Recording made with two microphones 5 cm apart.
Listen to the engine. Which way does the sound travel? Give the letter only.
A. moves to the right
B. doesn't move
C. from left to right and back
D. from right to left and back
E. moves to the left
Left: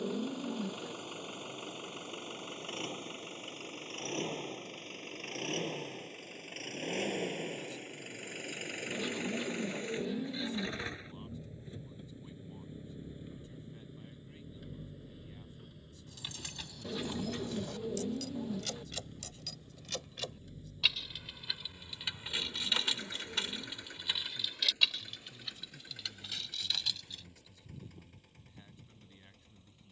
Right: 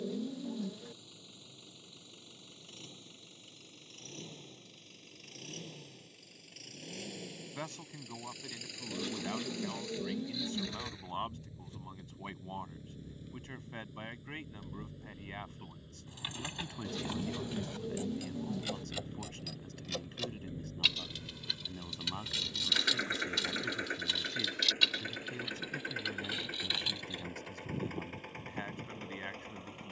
A.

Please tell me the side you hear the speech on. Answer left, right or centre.
right.